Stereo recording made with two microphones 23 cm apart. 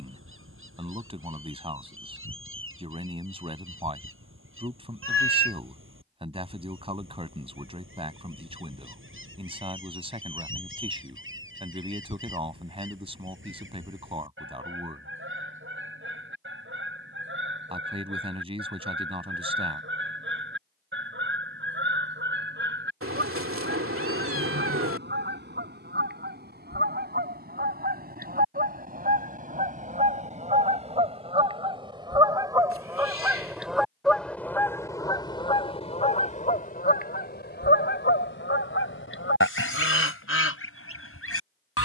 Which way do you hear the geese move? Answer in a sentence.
You can hear the geese go from the right side to the left.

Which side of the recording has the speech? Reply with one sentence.
You can hear the speech on the right.